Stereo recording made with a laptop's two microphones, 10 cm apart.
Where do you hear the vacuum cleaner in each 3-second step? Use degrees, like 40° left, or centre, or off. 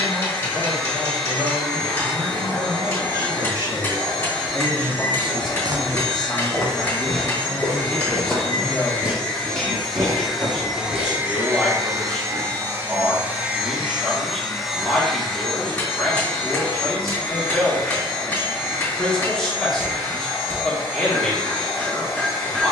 20° left, 20° left, 20° left, 10° right, 10° right, 10° left, 20° left, 20° left.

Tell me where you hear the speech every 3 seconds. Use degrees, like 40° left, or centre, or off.
60° right, 20° right, 10° left, 10° left, 10° left, 10° left, 10° left, 10° left.